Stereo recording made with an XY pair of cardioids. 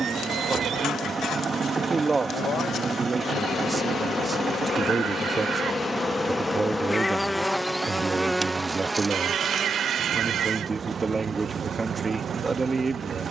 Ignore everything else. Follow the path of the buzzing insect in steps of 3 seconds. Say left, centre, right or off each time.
left, left, centre, right, right.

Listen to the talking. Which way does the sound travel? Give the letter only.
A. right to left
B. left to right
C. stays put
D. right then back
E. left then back
C.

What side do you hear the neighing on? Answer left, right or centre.
right.